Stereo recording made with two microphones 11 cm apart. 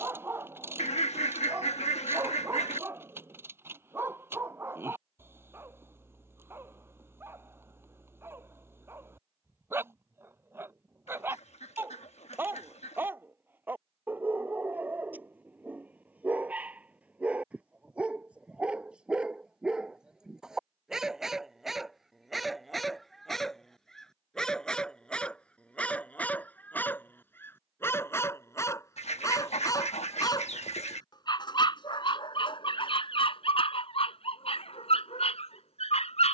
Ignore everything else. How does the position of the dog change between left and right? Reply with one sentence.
In this clip you hear the dog travel towards the left.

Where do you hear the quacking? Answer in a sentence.
You can hear the quacking on the left.